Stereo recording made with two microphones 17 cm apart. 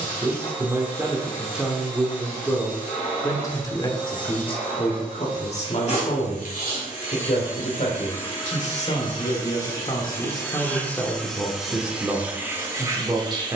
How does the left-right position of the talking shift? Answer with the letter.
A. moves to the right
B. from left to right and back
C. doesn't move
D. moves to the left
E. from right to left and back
E.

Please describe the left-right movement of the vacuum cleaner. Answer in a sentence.
You can hear the vacuum cleaner move to the right.